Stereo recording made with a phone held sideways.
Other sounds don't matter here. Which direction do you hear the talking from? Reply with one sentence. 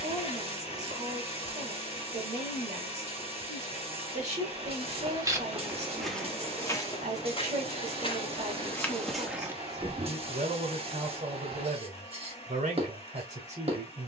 You can hear the talking on the right.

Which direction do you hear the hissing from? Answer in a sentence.
You can hear the hissing on the right.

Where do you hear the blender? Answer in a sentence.
In this clip you hear the blender on the left.